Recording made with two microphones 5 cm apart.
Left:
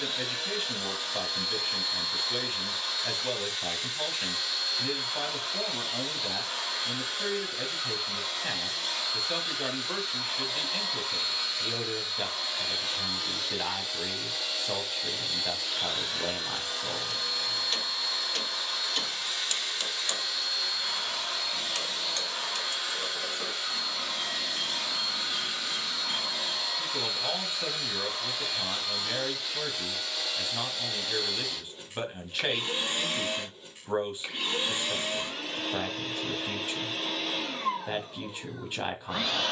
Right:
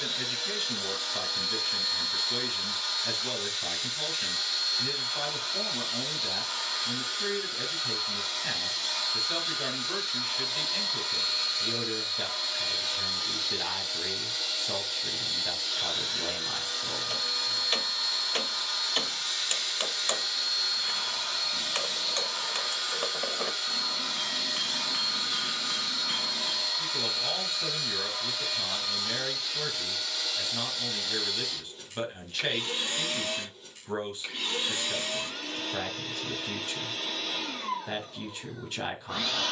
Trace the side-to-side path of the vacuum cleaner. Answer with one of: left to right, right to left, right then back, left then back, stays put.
stays put.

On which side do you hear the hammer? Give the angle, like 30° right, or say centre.
30° right.